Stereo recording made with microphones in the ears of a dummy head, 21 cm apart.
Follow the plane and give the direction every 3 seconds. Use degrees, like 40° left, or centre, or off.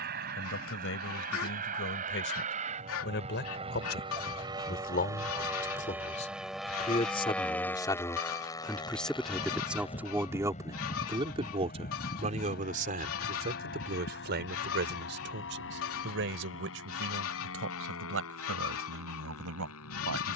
40° right, 20° right, 10° left, 30° left, 40° left, 50° left, 60° left.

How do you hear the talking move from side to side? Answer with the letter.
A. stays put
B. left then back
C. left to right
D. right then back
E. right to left
C.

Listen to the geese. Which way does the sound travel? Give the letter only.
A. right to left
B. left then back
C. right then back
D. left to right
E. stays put
E.